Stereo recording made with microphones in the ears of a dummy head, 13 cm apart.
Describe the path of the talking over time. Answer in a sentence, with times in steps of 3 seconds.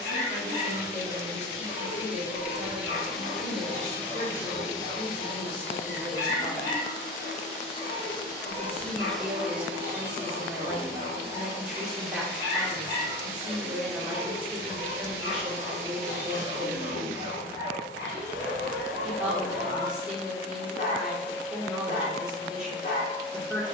You can hear the talking on the left from 0 s and in the centre from 6 s.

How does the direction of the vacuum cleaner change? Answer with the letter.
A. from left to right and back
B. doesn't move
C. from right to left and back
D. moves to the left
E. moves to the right
C.